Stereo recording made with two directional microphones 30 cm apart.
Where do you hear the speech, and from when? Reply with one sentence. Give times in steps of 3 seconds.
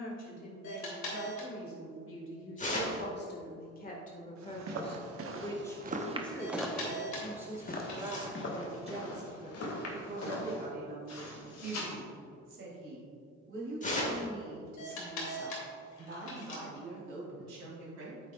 You can hear the speech on the left from 0 s, in the centre from 6 s and on the right from 9 s.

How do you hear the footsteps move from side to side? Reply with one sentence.
You can hear the footsteps move to the left.